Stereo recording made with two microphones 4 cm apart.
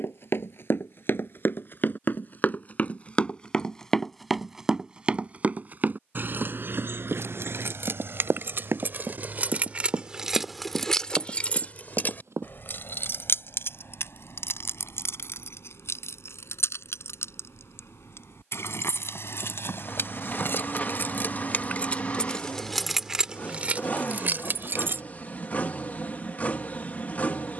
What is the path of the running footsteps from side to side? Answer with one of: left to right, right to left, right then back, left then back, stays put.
left to right.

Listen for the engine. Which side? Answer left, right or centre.
left.